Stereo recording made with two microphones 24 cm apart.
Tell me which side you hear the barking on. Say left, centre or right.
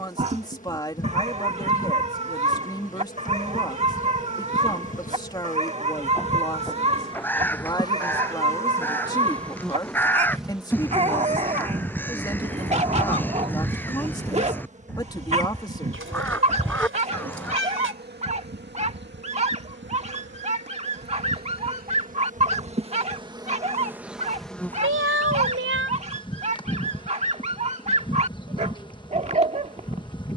right.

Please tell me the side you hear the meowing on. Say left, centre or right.
right.